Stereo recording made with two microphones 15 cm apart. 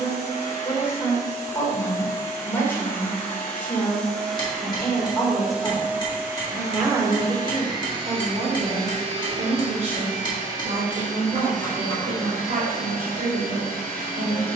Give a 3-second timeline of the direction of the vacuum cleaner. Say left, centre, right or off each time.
left, centre, right, right, right.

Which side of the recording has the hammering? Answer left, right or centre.
left.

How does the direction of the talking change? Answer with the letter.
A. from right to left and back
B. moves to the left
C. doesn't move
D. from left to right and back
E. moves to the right
E.